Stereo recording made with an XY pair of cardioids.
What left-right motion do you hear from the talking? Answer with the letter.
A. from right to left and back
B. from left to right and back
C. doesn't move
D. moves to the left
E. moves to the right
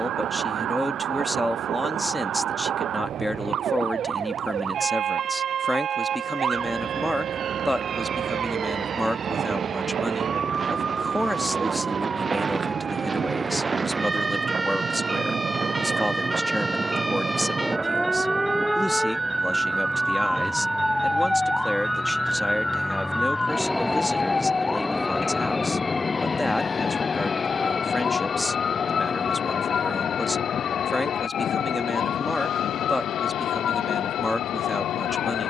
C.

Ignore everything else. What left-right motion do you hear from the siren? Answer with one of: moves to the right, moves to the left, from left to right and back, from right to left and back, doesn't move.
moves to the left.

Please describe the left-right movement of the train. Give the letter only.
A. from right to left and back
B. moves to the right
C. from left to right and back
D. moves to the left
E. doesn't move
D.